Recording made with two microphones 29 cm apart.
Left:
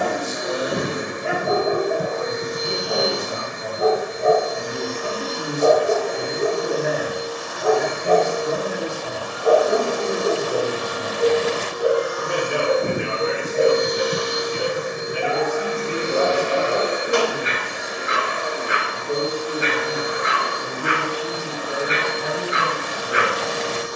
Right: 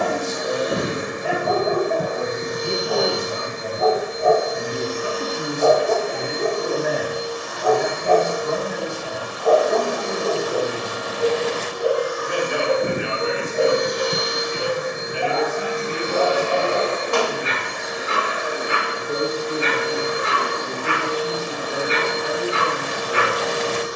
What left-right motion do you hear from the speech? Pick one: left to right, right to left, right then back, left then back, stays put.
right to left.